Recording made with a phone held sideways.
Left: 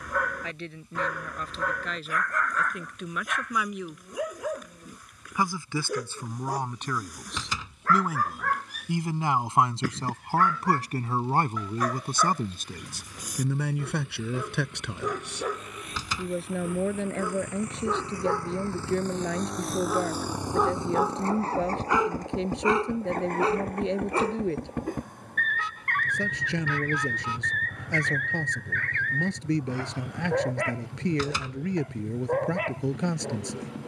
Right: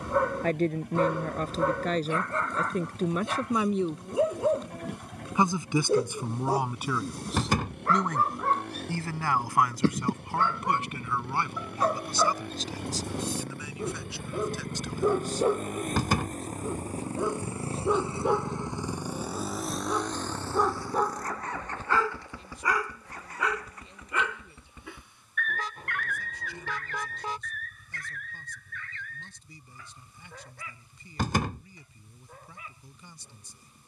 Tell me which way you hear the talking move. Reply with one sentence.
You can hear the talking go from the right side to the left.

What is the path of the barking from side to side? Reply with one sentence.
You can hear the barking move from right to left.